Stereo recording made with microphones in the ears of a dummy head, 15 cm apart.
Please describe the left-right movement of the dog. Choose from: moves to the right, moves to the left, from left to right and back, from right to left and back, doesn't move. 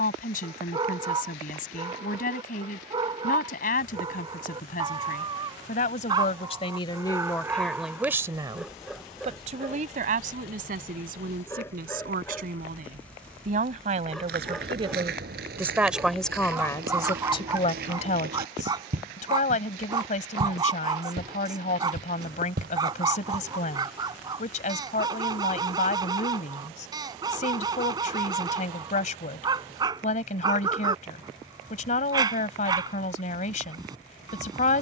from right to left and back.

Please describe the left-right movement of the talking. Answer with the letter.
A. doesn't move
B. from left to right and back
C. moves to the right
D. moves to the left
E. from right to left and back
B.